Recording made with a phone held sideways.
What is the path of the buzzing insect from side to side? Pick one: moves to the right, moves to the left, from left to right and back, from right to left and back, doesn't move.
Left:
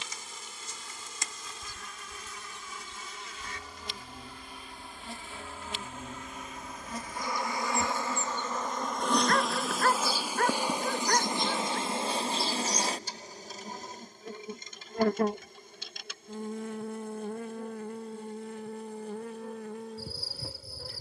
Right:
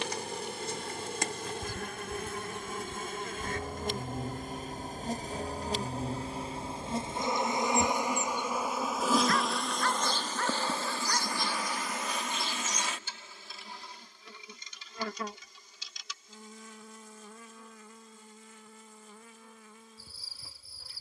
moves to the left.